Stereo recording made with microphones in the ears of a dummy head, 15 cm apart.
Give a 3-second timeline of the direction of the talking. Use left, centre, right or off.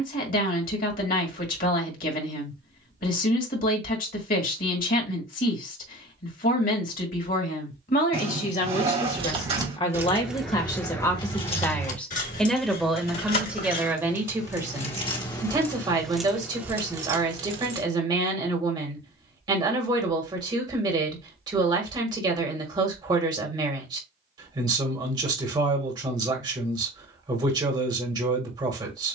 left, left, left, left, centre, right, right, right, right, right.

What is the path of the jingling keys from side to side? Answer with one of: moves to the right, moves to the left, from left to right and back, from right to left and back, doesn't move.
from right to left and back.